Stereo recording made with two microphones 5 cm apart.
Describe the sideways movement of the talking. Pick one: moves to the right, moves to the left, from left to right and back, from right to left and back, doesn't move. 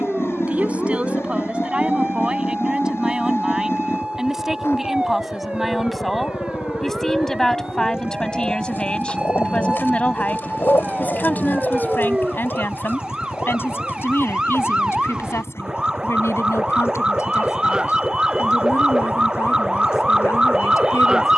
moves to the left.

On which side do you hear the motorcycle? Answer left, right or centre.
left.